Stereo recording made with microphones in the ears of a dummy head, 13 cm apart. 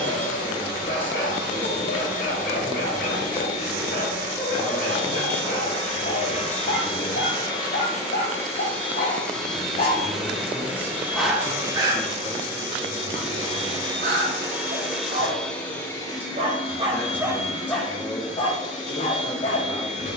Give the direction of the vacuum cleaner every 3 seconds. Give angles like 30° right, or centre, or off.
60° left, 50° left, 30° left, 10° right, 20° right, 30° left, 50° left.